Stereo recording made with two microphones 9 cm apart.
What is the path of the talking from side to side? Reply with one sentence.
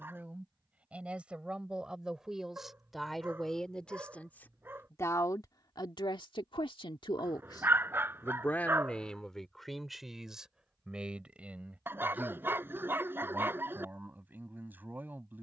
In this clip you hear the talking move from right to left and back again.